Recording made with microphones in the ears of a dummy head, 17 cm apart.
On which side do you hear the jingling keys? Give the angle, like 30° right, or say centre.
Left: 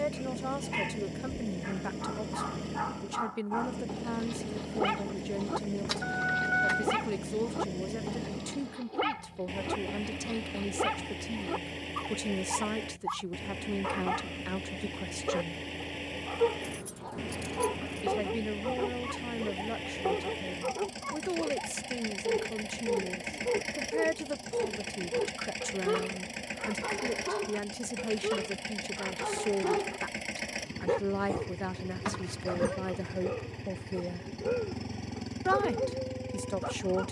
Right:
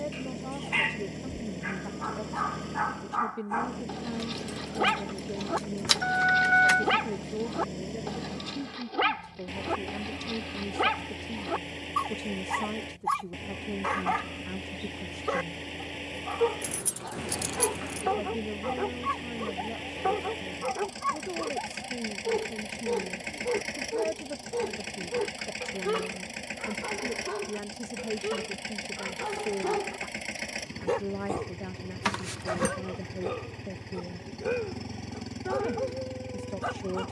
60° right.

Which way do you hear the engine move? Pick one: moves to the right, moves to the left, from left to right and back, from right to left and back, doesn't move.
doesn't move.